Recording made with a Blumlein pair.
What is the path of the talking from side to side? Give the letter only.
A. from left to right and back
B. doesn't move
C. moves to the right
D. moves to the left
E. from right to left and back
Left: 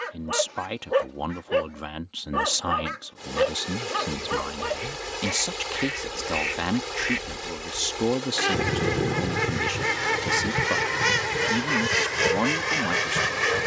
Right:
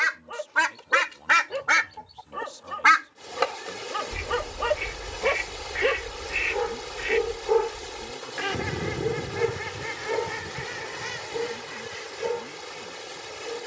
B.